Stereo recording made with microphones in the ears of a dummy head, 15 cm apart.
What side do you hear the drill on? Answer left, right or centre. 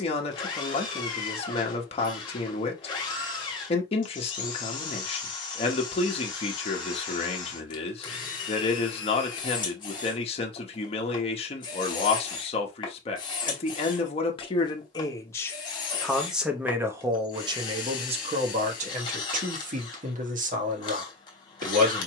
left.